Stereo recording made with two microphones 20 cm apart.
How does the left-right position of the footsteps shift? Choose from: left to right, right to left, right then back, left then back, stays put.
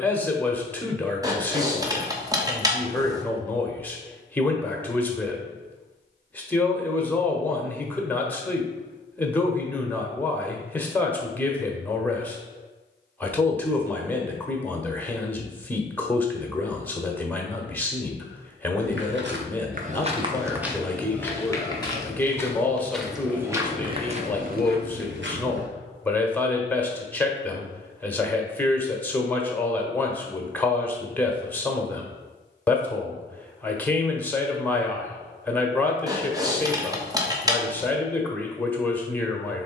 left then back.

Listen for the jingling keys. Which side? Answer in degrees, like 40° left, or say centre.
20° right.